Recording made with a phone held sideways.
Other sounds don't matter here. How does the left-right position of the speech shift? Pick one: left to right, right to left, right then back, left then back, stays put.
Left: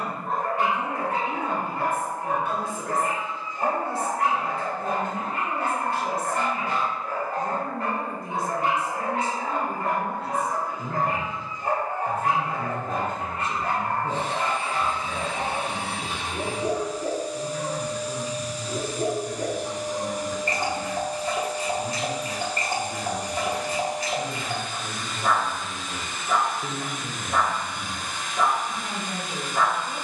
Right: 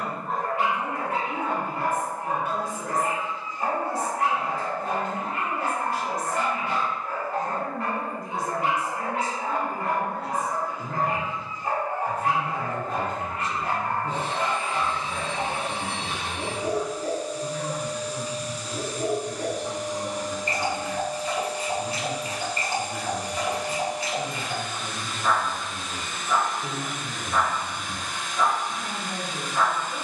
stays put.